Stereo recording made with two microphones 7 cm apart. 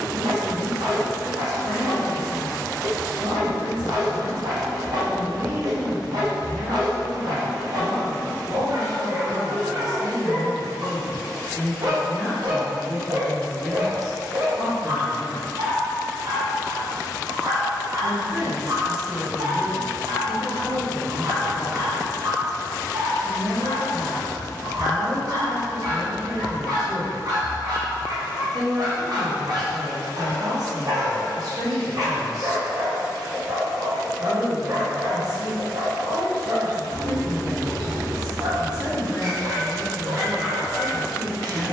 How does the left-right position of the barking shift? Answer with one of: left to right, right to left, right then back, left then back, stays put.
stays put.